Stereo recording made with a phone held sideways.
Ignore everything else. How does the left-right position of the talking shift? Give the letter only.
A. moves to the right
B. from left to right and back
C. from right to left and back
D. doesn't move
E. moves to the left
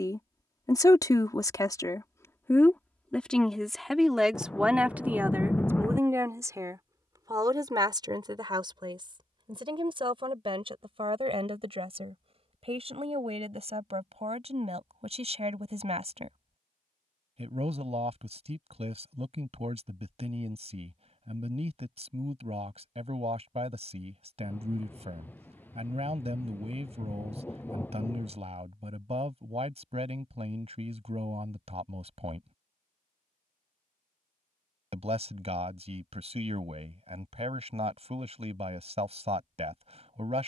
A.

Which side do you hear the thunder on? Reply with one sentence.
In this clip you hear the thunder in the centre.